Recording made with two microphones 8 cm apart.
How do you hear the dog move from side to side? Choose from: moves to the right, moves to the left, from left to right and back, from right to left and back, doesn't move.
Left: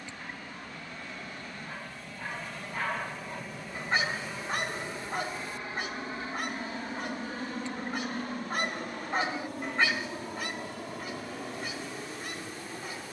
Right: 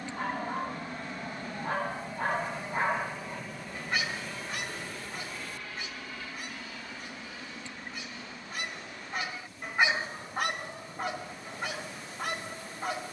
from right to left and back.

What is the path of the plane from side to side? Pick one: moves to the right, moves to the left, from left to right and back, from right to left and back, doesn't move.
moves to the left.